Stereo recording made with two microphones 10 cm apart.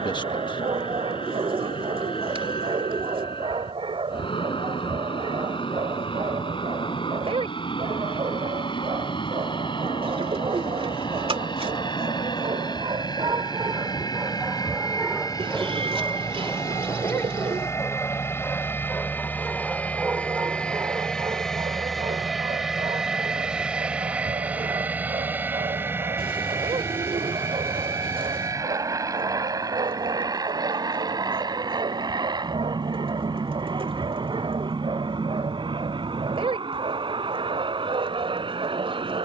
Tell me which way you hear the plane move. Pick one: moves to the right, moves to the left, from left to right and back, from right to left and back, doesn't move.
moves to the right.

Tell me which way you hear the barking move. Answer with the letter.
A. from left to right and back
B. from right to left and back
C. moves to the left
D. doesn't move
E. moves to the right
B.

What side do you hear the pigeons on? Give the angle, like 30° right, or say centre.
70° right.